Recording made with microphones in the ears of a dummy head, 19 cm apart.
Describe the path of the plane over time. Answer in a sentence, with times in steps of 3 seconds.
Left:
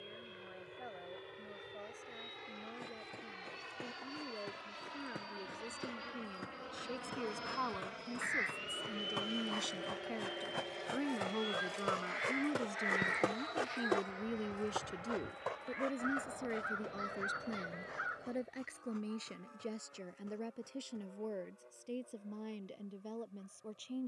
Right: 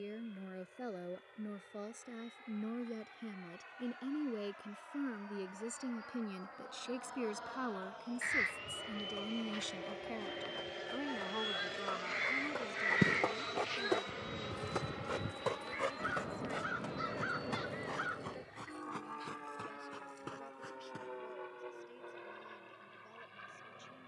In this clip you hear the plane on the left from 0 s, in the centre from 9 s and on the right from 12 s.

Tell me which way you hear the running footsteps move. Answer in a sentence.
You can hear the running footsteps travel towards the right.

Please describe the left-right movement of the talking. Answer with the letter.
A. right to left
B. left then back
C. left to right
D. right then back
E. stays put
A.